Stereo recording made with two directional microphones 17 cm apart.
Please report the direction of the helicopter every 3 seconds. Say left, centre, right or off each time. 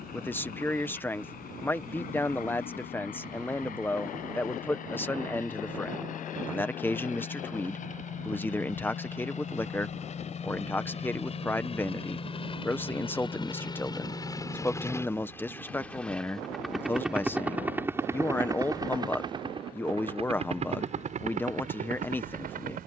left, left, left, left, left, centre, right, right.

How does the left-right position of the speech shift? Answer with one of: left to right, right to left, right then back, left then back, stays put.
stays put.